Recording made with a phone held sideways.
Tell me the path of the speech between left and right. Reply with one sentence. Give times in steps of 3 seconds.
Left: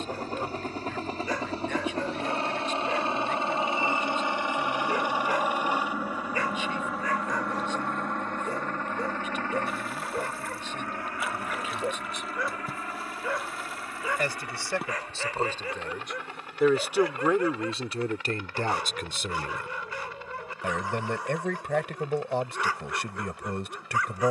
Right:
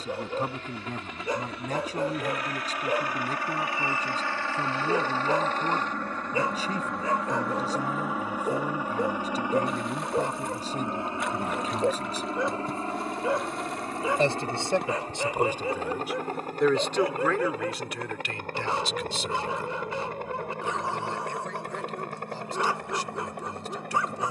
You can hear the speech on the right from 0 s, in the centre from 15 s and on the left from 18 s.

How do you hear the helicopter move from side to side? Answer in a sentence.
In this clip you hear the helicopter go from the left side to the right.